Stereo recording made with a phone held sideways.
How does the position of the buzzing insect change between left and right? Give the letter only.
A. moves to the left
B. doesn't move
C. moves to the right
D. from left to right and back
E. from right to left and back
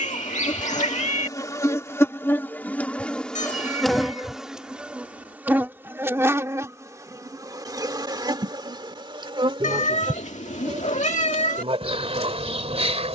C.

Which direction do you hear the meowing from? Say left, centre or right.
left.